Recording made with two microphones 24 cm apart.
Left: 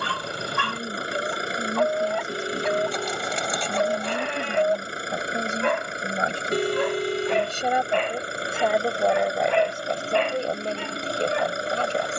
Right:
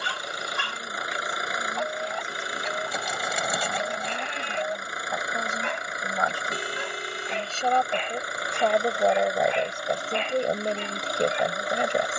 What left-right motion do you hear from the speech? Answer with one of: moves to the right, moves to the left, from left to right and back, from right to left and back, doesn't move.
moves to the right.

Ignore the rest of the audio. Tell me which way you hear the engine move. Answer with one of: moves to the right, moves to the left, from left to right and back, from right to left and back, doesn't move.
doesn't move.